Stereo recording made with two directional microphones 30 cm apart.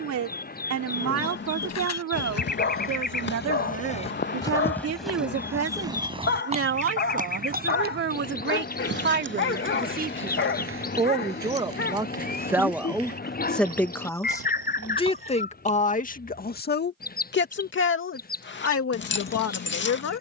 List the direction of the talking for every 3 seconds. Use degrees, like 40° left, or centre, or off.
60° right, 50° right, 40° right, 20° right, centre, 30° left, 50° left.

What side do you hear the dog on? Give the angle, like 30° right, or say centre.
40° left.